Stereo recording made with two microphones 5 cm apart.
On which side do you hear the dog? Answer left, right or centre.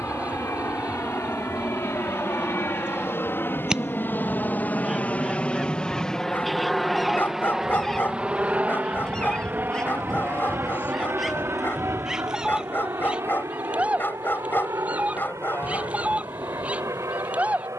left.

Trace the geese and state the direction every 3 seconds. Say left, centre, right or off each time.
right, centre, centre, centre, right, right.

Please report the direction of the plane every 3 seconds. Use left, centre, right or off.
left, left, centre, right, right, right.